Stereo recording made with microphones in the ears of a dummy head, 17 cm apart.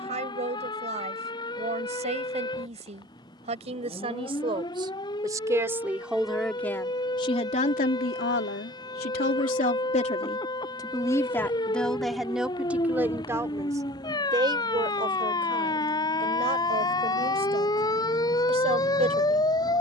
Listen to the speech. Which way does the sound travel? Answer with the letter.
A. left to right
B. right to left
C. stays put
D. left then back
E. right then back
D.